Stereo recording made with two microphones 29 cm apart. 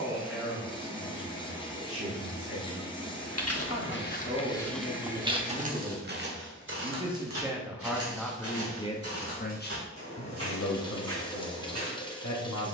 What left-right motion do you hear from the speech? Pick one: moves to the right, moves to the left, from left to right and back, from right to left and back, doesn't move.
moves to the left.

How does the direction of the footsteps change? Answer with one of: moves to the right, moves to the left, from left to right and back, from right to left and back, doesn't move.
moves to the right.